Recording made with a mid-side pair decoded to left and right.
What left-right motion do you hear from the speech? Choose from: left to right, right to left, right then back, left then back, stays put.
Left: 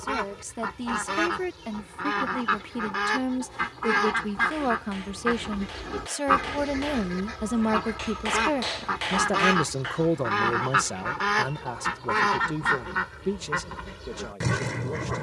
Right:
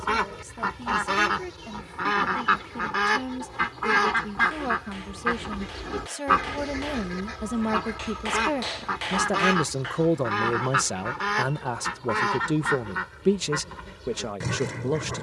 left to right.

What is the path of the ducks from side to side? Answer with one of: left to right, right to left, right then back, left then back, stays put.
right to left.